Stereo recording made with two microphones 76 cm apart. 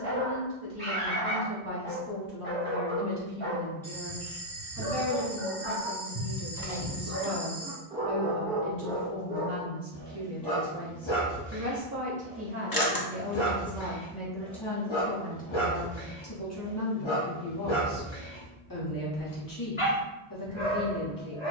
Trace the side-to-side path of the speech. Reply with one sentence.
In this clip you hear the speech move from left to right and back again.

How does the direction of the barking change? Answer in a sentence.
In this clip you hear the barking move from right to left.